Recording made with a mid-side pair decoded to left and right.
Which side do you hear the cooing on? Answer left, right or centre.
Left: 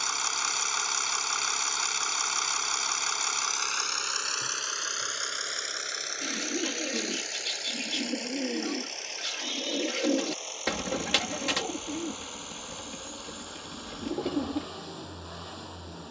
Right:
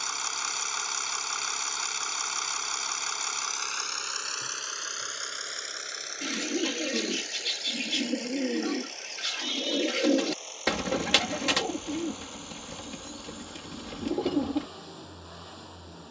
right.